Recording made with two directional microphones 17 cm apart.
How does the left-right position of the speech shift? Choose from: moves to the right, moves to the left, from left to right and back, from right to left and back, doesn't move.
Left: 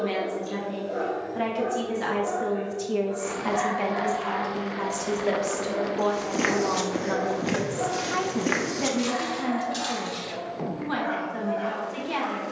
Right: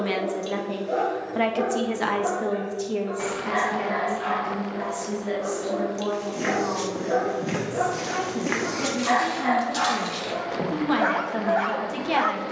from right to left and back.